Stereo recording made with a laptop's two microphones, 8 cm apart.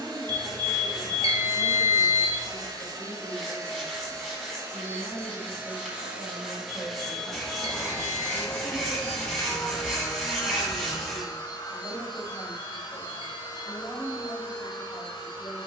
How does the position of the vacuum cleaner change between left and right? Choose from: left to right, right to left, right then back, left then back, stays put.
right to left.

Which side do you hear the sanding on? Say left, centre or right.
centre.